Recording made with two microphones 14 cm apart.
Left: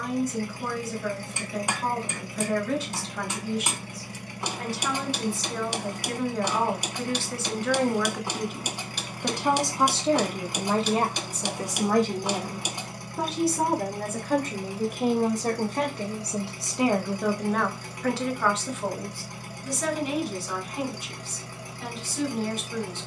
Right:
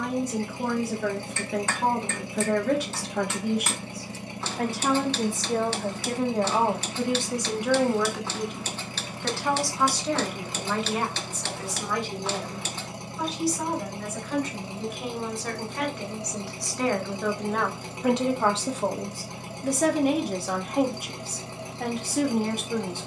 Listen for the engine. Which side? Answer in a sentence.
You can hear the engine on the right.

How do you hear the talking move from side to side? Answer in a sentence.
You can hear the talking move from right to left and back again.